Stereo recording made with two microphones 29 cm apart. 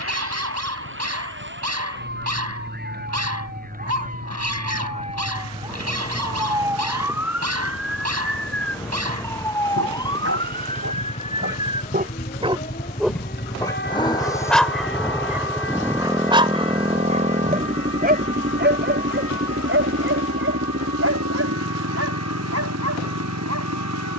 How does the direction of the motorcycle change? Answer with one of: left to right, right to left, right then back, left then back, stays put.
left to right.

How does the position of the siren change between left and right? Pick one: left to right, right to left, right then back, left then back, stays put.
right to left.